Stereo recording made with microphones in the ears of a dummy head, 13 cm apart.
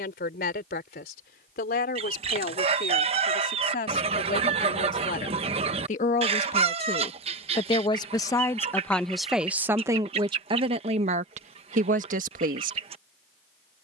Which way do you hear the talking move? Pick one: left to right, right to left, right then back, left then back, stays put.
left to right.